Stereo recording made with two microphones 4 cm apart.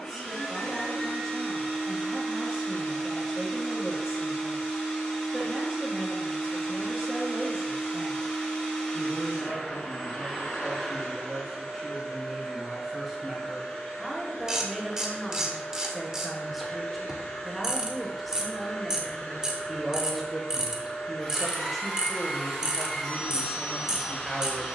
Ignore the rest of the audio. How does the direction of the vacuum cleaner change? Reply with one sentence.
You can hear the vacuum cleaner stay in one place.